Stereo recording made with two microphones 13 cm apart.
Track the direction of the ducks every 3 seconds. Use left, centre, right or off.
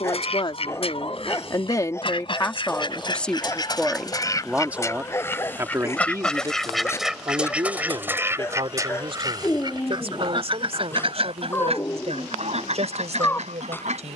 left, left, centre, right, right.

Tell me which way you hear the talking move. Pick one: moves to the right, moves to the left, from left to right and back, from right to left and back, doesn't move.
moves to the right.